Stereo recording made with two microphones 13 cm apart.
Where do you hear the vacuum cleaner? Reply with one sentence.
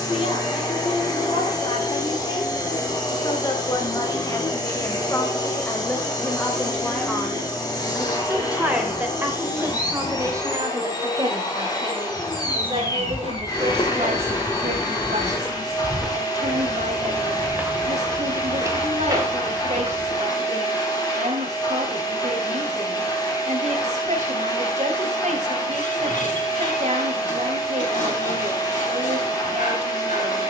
In this clip you hear the vacuum cleaner on the left.